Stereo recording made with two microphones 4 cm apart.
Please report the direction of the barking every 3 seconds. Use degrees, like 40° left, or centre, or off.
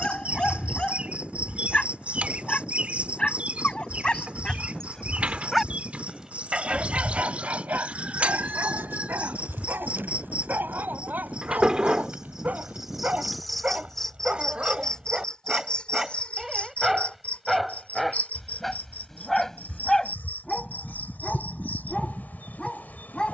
20° left, 20° left, 40° right, 50° right, 30° right, 10° right, 10° left, 20° left.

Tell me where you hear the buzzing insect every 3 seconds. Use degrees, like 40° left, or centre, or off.
30° right, 30° right, 30° right, 30° right, centre, 30° left, 50° left, 50° left.